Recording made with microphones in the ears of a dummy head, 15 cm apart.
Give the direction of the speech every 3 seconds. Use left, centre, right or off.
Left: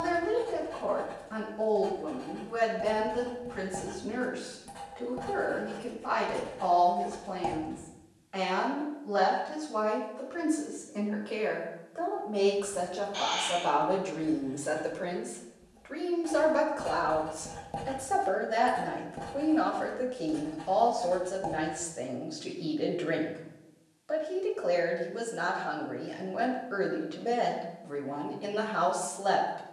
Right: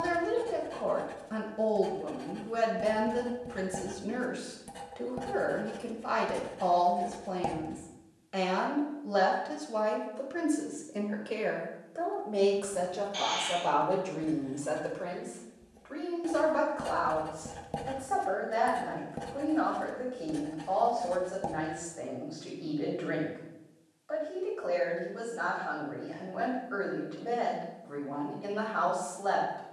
right, right, right, right, centre, left, left, left, left, left.